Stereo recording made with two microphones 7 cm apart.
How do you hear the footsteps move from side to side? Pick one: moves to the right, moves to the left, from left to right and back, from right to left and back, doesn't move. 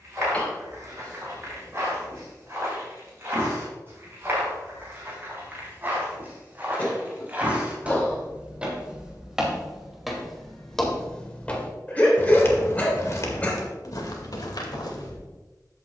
moves to the left.